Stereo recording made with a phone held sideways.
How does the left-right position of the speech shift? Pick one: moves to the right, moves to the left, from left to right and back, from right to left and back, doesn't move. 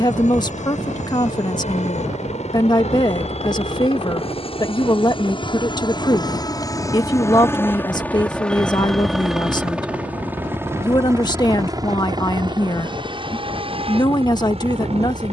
doesn't move.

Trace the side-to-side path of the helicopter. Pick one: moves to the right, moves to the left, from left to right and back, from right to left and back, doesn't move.
moves to the right.